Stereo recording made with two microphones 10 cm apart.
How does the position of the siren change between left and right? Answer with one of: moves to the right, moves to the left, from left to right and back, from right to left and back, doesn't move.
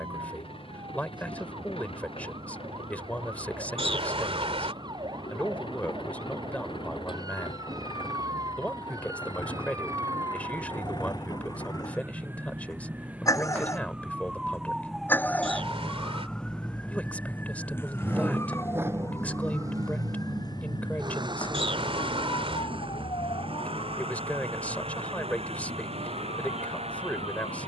moves to the left.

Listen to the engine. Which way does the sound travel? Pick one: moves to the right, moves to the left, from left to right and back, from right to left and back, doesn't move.
moves to the right.